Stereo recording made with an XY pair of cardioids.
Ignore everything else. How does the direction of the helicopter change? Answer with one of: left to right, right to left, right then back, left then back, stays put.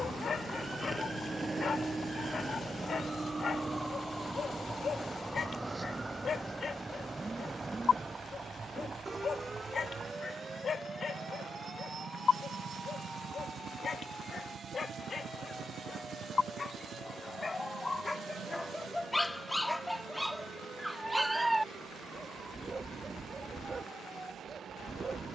left to right.